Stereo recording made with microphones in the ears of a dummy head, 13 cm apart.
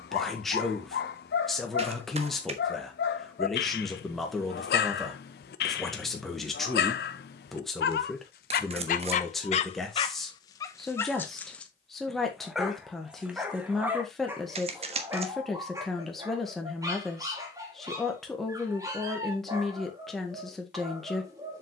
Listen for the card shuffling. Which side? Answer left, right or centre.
right.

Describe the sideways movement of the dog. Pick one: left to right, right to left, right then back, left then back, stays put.
left to right.